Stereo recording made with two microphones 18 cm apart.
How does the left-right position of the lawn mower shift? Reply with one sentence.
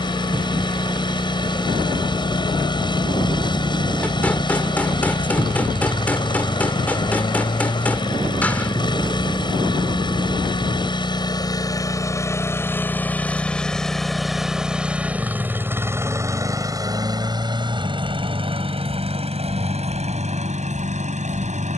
You can hear the lawn mower go from the left side to the right.